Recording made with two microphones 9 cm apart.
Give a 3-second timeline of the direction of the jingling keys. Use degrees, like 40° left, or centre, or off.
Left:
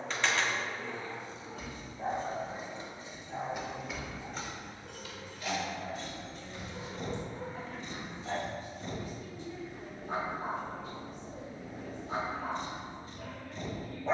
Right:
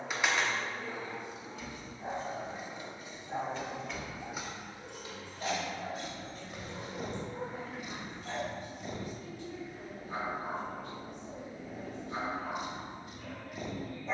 40° left, 10° right, 60° right, off, off.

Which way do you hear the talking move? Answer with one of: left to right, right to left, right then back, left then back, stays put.
stays put.